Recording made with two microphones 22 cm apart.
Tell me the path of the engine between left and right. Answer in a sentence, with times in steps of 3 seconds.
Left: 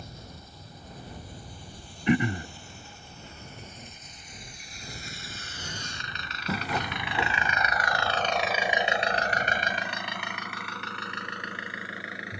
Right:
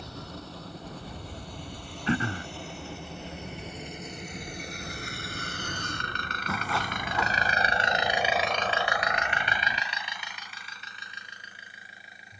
In this clip you hear the engine on the right from 0 s and on the left from 9 s.